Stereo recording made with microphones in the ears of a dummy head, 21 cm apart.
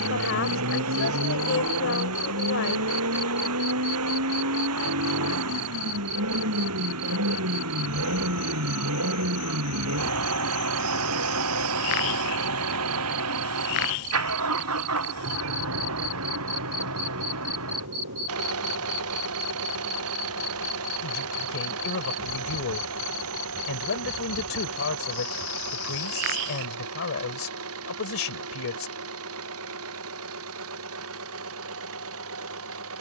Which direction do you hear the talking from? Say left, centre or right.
left.